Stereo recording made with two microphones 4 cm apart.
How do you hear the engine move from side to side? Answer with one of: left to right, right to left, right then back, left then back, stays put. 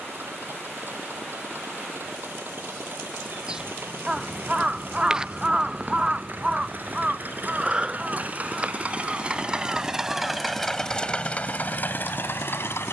right to left.